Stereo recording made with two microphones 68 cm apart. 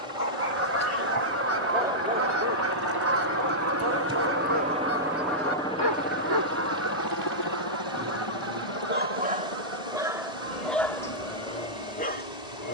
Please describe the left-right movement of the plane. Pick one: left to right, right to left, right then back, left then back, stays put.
right to left.